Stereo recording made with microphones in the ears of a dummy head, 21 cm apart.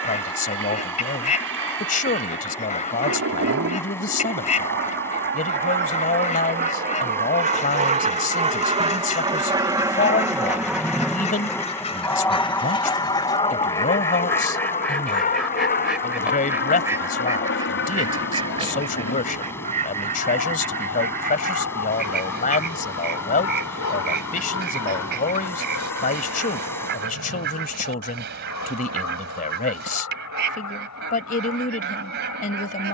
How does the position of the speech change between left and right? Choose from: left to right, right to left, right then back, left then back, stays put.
stays put.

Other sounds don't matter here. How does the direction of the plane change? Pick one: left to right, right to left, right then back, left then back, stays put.
right to left.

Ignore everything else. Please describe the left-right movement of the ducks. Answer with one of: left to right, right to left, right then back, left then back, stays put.
left to right.